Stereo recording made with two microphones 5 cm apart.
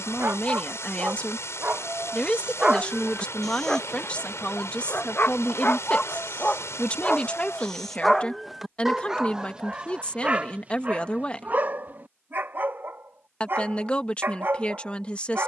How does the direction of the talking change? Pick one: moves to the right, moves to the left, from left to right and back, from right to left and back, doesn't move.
doesn't move.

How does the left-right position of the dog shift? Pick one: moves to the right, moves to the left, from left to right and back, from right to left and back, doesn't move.
from right to left and back.